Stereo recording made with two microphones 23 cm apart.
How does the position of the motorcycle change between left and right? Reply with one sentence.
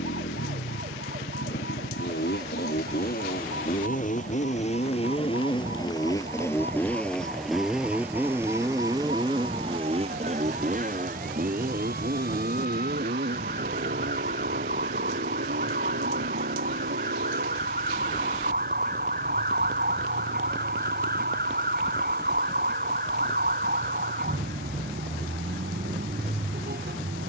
You can hear the motorcycle move from left to right.